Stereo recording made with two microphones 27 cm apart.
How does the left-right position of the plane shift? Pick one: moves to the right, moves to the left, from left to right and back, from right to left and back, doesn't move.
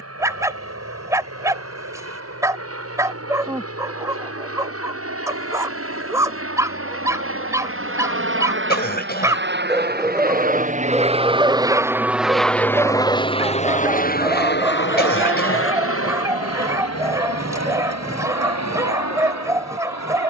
moves to the left.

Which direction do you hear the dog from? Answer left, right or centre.
centre.